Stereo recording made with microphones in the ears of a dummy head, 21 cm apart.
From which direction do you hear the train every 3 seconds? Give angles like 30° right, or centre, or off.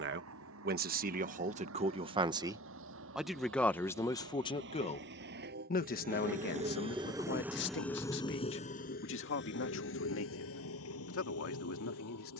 70° right, 60° right, centre, 60° left.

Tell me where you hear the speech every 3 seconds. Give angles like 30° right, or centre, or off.
30° right, 20° left, 50° left, 60° left.